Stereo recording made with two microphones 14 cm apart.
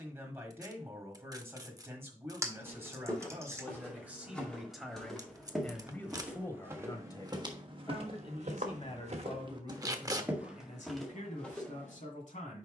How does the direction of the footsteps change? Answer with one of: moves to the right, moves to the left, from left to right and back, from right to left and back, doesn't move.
from left to right and back.